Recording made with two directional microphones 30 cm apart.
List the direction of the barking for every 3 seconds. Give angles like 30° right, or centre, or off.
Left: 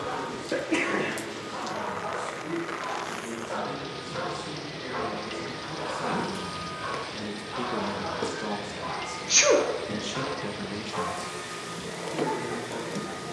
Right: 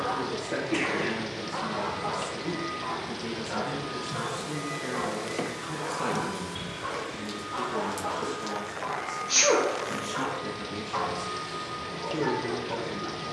10° right, 20° left, centre, 20° right, 20° right.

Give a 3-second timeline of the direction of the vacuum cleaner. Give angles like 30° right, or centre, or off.
60° right, 20° right, 20° left, 20° left, 20° left.